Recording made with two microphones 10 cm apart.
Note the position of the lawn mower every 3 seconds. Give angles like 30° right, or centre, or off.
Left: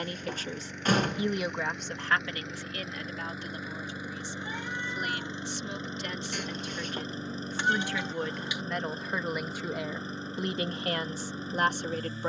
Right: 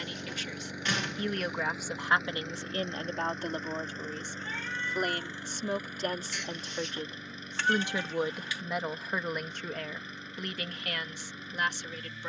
10° right, 10° left, 30° left, 30° left.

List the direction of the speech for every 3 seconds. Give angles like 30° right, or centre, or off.
centre, 50° right, 20° right, 20° left.